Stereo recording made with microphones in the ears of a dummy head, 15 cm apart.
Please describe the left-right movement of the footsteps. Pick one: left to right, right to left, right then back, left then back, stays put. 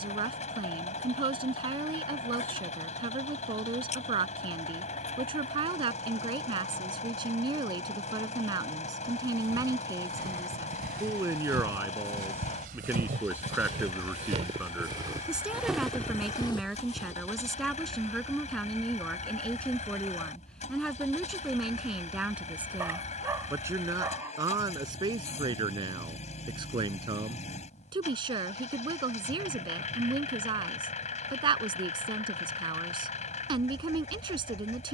right to left.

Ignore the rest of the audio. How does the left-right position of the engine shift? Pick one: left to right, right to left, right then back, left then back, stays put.
stays put.